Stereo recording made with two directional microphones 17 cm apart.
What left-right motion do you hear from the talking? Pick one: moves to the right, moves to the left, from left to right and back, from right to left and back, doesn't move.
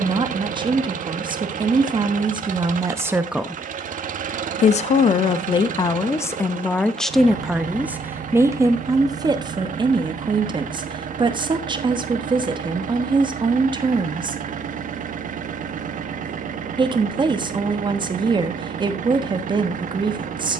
from right to left and back.